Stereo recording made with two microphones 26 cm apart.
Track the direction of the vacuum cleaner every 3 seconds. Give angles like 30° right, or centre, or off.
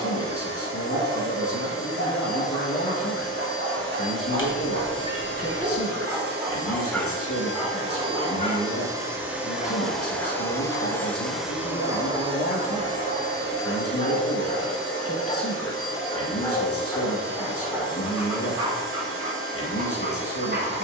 60° right, 50° right, 30° right, centre, 40° right, 60° right, 60° right.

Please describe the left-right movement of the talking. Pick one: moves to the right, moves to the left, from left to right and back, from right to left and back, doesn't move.
doesn't move.